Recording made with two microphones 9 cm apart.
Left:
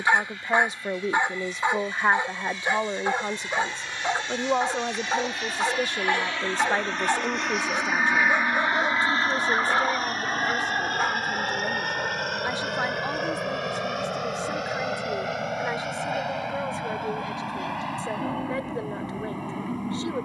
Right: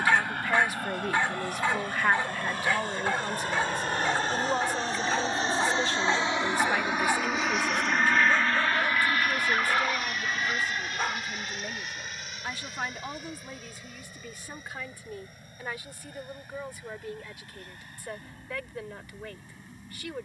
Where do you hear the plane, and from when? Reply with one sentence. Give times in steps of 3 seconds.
You can hear the plane on the right from 0 s, in the centre from 6 s and on the left from 9 s.